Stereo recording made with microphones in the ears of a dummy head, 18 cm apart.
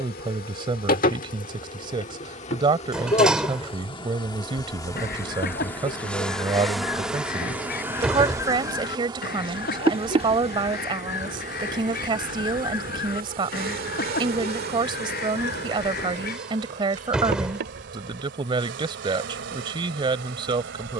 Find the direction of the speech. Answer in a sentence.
You can hear the speech on the right.